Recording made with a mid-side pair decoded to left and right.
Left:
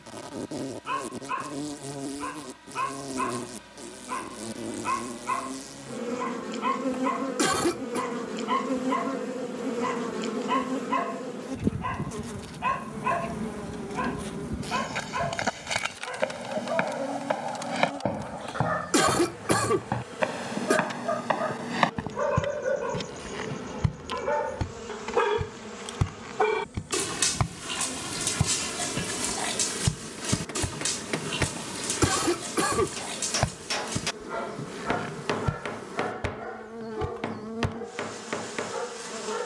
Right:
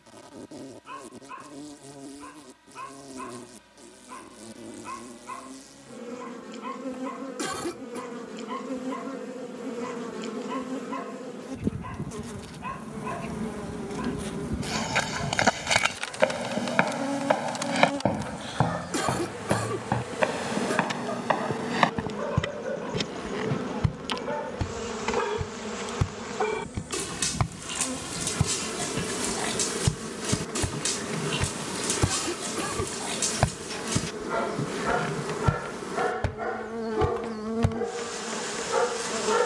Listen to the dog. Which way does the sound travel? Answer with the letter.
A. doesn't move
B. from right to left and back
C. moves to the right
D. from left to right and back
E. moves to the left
C.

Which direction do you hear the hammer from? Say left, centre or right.
left.